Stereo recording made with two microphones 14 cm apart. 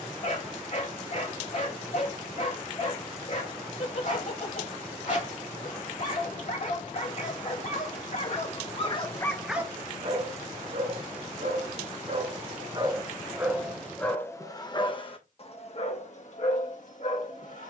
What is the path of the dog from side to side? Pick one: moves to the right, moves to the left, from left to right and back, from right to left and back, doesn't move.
from left to right and back.